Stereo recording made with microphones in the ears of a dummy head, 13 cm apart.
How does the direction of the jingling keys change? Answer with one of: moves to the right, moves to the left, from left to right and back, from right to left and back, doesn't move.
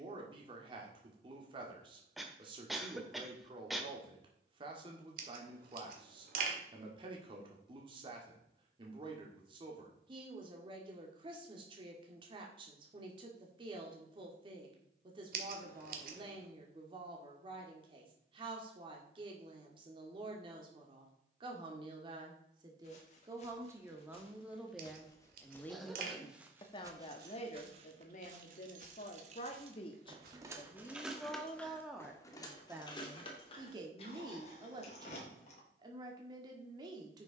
moves to the left.